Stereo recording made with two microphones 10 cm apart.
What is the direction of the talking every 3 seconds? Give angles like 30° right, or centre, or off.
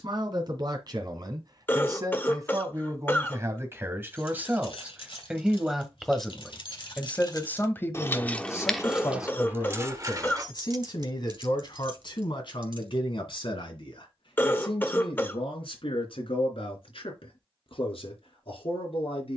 40° right, 20° right, 20° left, 50° left, 60° left, 70° left, 70° left.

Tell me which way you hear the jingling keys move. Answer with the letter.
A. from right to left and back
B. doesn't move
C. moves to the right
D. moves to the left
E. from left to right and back
C.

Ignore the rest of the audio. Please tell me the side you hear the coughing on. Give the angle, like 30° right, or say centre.
20° left.